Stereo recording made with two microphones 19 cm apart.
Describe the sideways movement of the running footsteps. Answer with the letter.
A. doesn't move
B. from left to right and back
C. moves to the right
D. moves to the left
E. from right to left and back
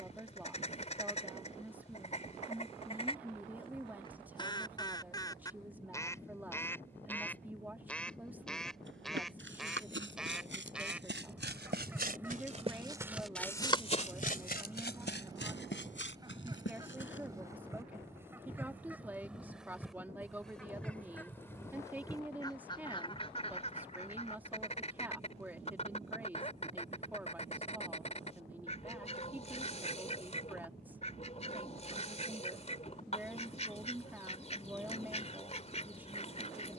D.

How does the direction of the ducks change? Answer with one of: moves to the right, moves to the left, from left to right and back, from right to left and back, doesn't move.
from left to right and back.